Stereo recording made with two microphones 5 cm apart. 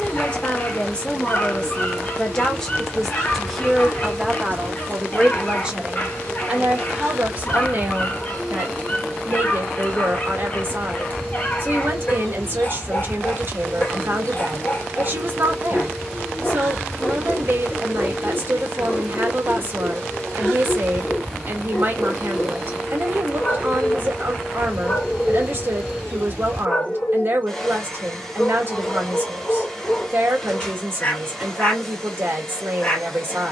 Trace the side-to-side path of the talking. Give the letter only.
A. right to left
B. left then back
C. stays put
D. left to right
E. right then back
D.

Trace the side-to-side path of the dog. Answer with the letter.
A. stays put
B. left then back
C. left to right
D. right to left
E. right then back
A.